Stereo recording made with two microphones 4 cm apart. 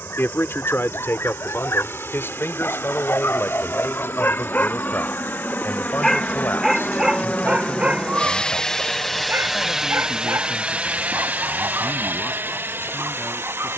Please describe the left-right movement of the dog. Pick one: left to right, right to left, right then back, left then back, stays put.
left to right.